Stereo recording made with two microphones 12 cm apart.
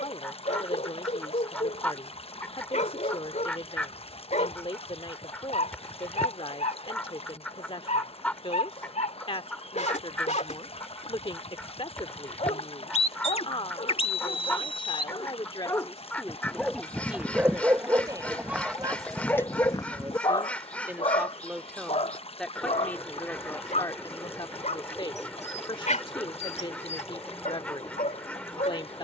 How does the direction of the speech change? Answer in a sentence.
You can hear the speech go right and come back.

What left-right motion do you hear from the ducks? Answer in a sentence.
You can hear the ducks stay in one place.